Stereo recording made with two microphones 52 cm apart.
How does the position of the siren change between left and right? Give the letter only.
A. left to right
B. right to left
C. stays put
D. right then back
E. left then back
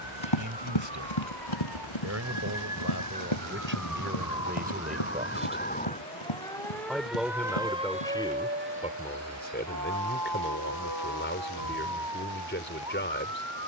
A.